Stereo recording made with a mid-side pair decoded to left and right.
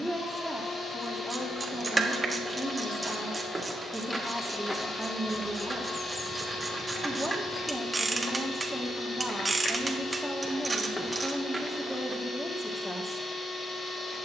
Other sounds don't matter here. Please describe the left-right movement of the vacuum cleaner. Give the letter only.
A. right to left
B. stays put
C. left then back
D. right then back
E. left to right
B.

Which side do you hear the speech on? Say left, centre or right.
centre.